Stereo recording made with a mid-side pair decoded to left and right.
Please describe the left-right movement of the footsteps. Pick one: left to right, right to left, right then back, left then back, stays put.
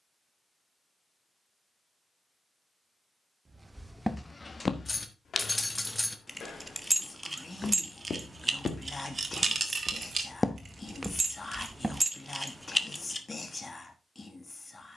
left then back.